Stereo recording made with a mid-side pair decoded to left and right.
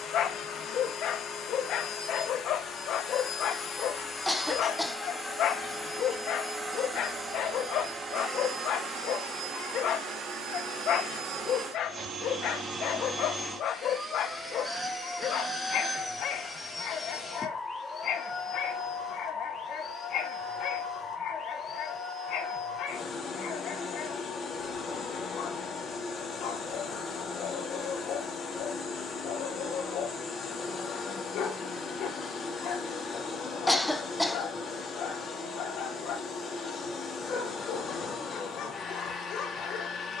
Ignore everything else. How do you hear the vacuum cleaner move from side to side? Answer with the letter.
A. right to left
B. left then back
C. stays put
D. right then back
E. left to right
D.